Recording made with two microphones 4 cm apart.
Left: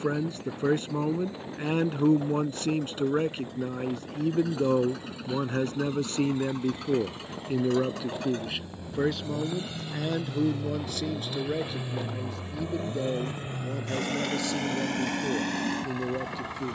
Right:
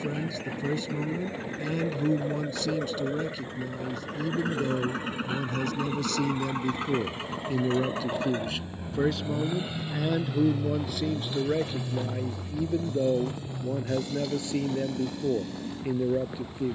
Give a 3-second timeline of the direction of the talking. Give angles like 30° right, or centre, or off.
40° left, 40° left, 20° left, 10° right, 20° right, 20° right.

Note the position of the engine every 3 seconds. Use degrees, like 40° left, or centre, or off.
50° right, 50° right, 30° right, centre, 50° left, 80° left.